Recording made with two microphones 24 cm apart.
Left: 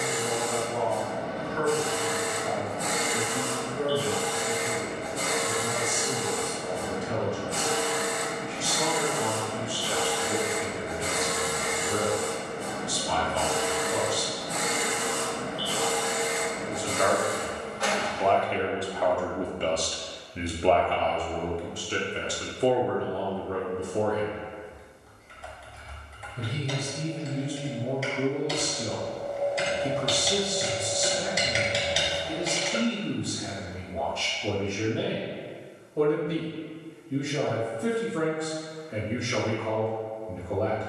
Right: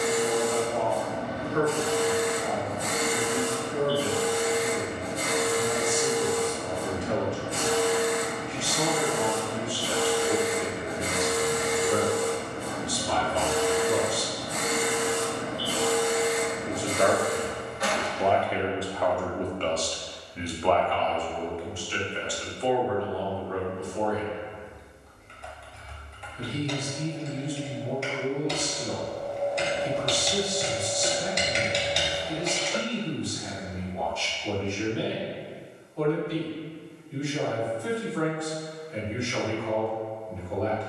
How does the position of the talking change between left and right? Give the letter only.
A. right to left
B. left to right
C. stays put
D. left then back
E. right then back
A.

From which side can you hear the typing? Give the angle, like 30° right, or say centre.
centre.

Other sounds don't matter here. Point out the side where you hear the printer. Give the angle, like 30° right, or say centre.
20° right.